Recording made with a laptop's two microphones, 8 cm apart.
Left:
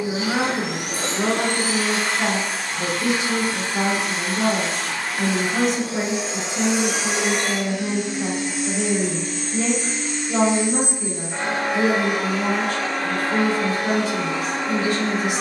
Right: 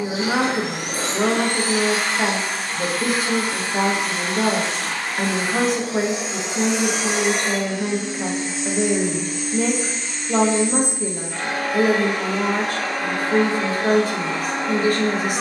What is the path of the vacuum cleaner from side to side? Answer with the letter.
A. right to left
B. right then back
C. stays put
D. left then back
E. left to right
D.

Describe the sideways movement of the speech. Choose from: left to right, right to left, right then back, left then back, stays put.
stays put.